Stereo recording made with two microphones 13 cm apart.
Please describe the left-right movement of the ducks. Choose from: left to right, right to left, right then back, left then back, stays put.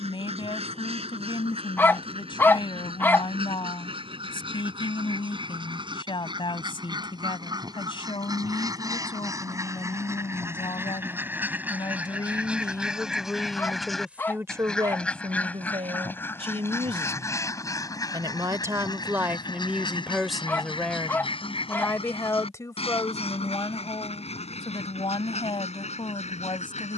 right to left.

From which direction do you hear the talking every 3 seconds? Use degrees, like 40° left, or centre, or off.
40° left, 40° left, 40° left, 40° left, centre, 50° right, 10° right, 20° left, 40° left.